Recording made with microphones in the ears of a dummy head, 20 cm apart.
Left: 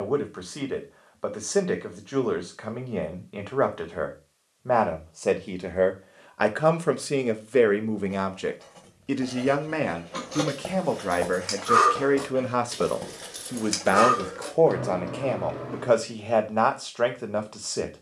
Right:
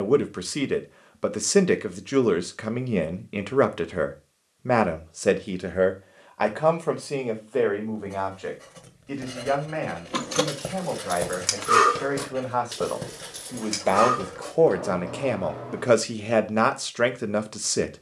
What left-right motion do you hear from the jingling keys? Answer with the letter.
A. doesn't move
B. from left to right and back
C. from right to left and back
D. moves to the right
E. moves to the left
E.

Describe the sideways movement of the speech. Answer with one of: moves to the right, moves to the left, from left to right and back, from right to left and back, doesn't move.
from right to left and back.